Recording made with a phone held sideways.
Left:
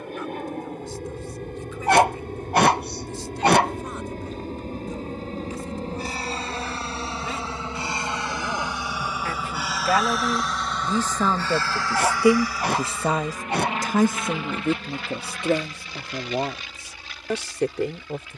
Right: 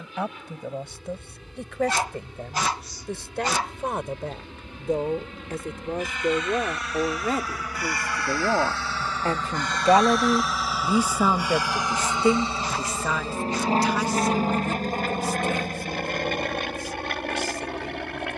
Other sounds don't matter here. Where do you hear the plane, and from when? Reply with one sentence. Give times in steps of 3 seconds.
You can hear the plane on the left from 0 s, in the centre from 9 s and on the right from 12 s.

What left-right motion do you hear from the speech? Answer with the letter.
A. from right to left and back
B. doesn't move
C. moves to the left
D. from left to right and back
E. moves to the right
C.